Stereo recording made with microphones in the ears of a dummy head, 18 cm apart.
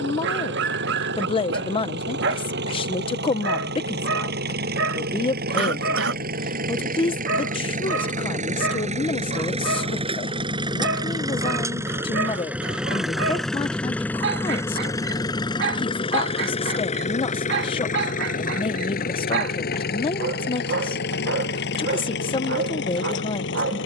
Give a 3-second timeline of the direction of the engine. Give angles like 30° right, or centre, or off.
60° right, 50° right, 40° right, 20° right, centre, 30° left, 50° left, 60° left.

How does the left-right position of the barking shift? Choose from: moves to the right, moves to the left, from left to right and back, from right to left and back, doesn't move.
doesn't move.